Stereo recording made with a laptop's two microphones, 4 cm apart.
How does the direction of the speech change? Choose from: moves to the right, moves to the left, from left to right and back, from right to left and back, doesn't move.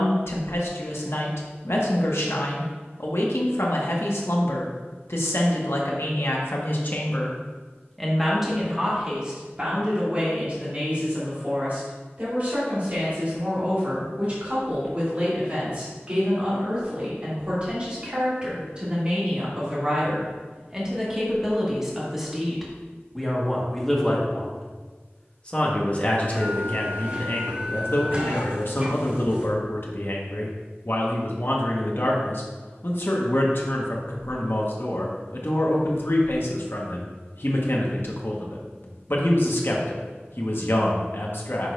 from left to right and back.